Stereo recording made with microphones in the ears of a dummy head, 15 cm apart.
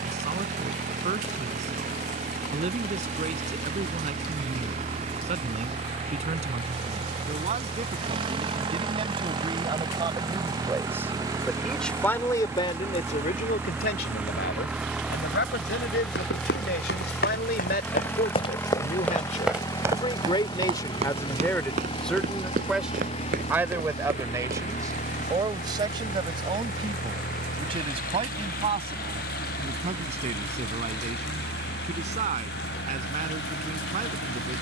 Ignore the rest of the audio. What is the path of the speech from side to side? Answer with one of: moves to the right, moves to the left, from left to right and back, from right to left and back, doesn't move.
from right to left and back.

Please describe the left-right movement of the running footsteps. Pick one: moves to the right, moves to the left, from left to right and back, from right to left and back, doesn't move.
moves to the right.